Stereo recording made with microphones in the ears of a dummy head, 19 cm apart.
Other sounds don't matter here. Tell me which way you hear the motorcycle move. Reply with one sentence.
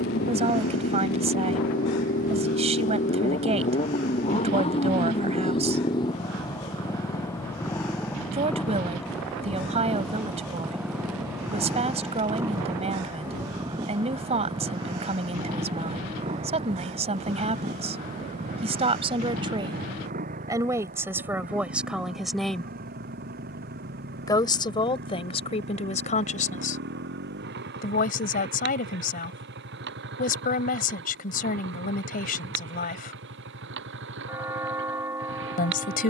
In this clip you hear the motorcycle move to the right.